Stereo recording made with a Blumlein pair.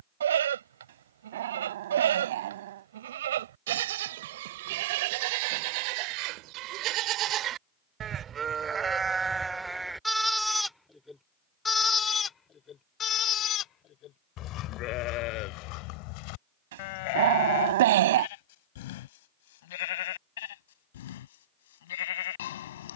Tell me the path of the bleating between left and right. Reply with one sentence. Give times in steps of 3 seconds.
In this clip you hear the bleating on the right from 0 s, in the centre from 9 s and on the left from 12 s.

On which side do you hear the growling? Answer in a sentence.
You can hear the growling on the right.